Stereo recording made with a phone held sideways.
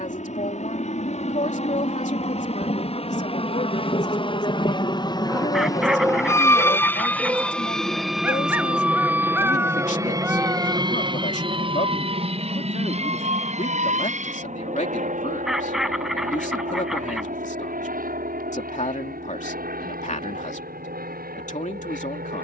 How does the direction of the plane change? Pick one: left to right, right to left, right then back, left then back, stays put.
left to right.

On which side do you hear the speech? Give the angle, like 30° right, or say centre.
60° left.